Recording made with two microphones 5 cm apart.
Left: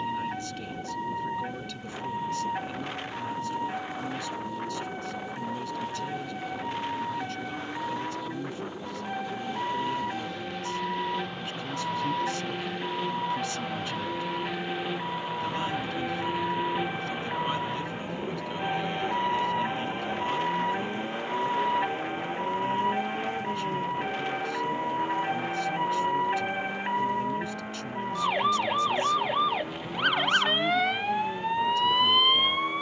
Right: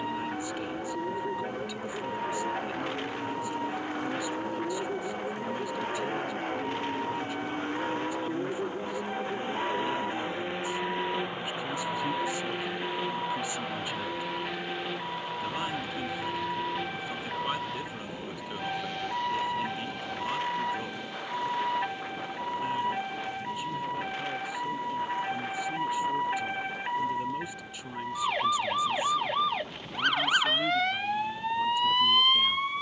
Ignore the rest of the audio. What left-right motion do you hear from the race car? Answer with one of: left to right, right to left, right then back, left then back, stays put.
right to left.